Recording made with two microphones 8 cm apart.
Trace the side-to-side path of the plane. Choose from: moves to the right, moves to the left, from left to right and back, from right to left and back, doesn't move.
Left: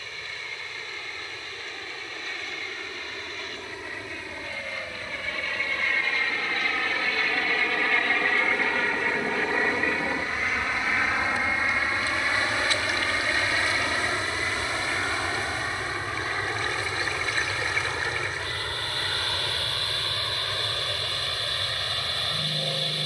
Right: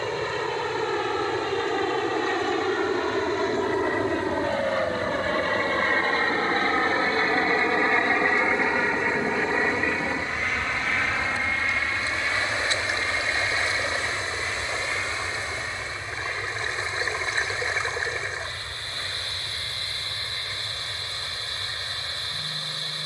moves to the left.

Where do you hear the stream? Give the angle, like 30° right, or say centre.
30° right.